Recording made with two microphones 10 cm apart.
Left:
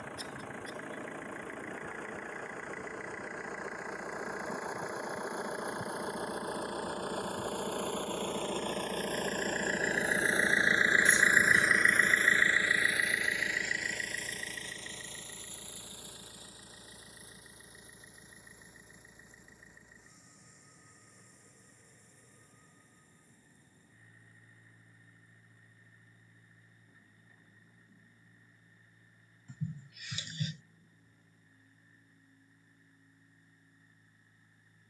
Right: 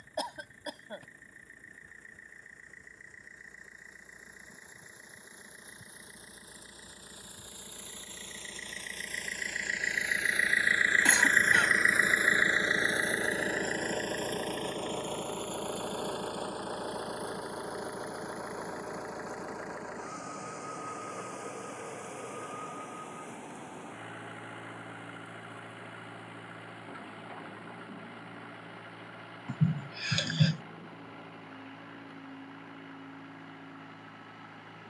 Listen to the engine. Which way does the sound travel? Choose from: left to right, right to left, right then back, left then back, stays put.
left to right.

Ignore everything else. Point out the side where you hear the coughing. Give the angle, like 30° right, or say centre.
80° right.